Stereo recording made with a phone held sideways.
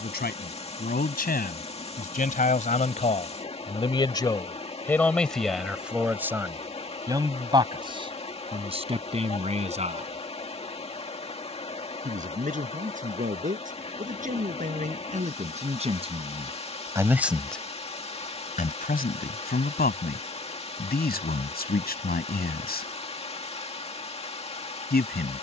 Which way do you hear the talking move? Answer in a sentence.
You can hear the talking go right and come back.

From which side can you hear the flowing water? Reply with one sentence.
You can hear the flowing water on the left.